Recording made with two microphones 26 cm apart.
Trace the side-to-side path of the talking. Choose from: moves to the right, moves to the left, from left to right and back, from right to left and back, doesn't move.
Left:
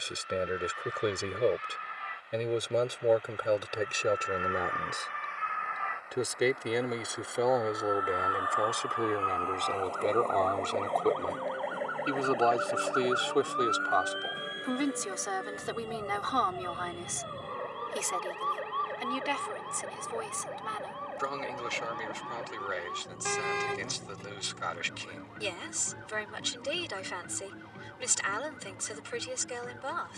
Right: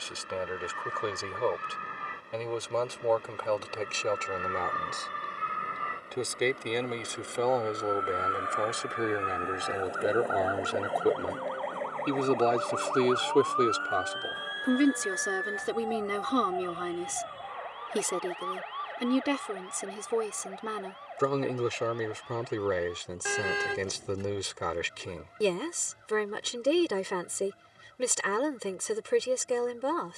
moves to the right.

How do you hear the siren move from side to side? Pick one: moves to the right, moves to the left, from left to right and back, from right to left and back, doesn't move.
moves to the left.